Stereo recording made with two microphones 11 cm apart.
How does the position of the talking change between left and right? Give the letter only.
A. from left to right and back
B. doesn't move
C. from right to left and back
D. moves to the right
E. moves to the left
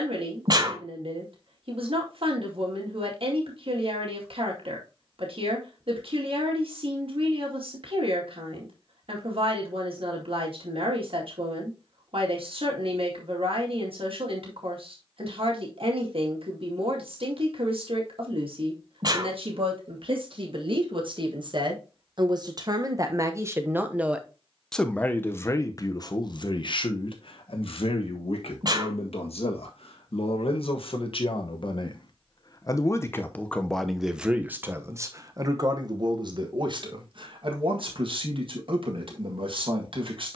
C.